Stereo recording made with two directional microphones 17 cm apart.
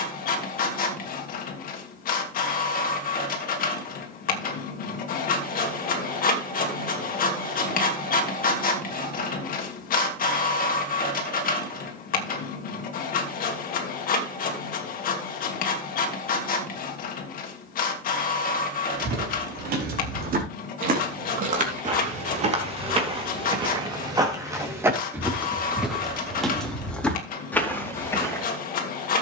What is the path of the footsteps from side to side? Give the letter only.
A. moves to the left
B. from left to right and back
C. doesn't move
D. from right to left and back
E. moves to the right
A.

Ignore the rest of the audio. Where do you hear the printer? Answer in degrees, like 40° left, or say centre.
60° left.